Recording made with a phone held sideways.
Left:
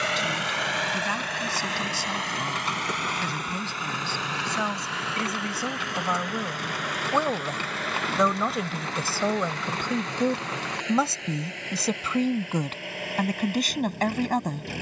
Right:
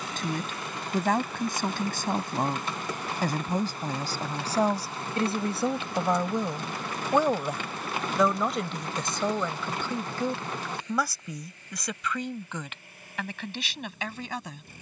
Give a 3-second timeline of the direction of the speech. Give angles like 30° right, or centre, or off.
50° right, 30° right, 10° right, 20° left, 40° left.